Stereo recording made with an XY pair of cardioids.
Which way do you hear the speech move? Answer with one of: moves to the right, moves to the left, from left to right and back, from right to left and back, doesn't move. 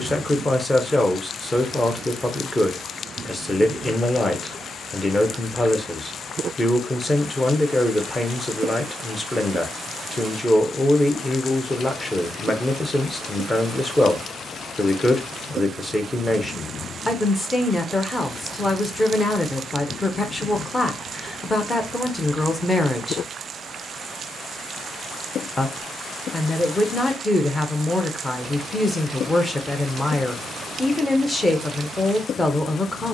doesn't move.